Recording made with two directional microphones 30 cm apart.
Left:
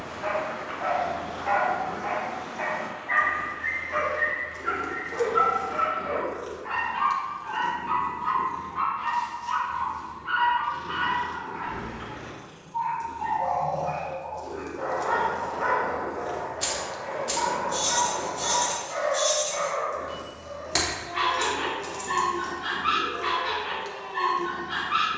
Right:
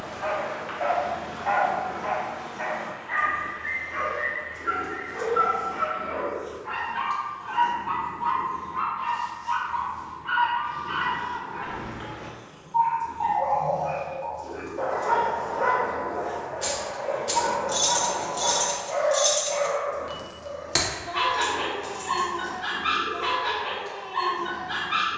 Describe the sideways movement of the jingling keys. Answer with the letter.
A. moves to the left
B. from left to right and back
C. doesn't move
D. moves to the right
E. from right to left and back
B.